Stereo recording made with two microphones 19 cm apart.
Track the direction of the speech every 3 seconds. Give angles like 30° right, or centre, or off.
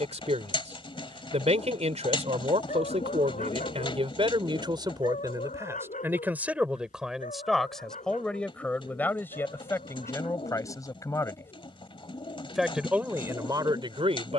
30° right, 20° right, centre, 10° left, 20° right.